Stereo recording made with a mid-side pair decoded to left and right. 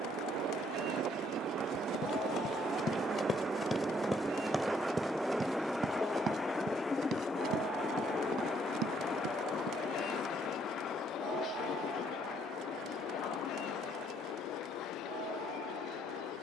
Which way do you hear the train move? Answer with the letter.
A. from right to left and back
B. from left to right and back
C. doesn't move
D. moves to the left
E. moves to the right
D.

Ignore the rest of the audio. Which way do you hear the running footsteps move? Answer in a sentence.
You can hear the running footsteps move from left to right.